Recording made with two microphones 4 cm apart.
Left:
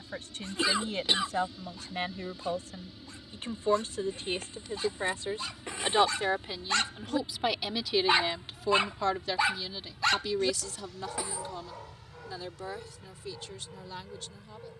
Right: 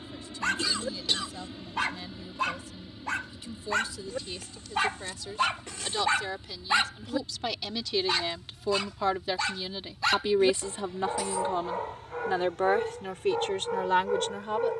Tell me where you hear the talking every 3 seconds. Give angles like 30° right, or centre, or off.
50° left, 40° left, 10° left, 30° right, 60° right.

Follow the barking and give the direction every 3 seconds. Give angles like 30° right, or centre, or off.
70° right, 70° right, centre, 20° right, 70° right.